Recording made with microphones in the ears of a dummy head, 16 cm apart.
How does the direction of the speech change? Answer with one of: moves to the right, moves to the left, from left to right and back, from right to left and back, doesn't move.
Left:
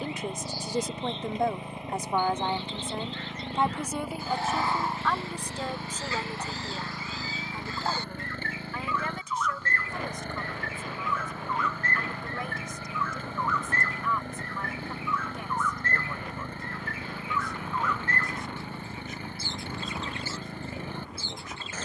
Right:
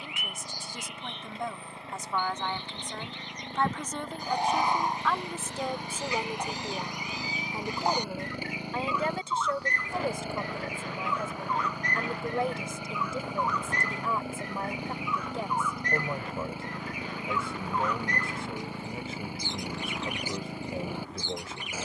moves to the right.